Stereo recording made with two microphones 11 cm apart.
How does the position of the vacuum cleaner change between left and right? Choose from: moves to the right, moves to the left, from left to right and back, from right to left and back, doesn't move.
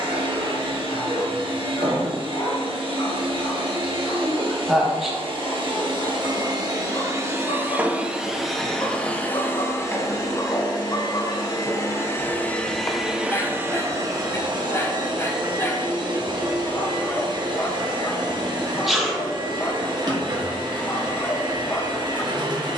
from right to left and back.